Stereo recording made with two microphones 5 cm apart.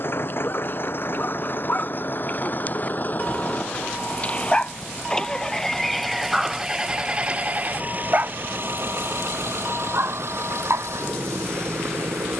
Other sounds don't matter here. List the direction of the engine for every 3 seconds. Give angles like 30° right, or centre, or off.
50° left, 20° left, 30° right, 70° right.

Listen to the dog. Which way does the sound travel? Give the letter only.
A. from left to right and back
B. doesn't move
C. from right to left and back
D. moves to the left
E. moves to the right
E.